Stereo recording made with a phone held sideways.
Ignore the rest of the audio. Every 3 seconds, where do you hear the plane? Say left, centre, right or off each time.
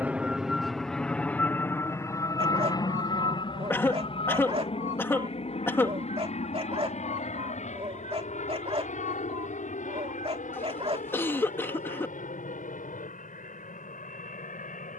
centre, left, left, left, left.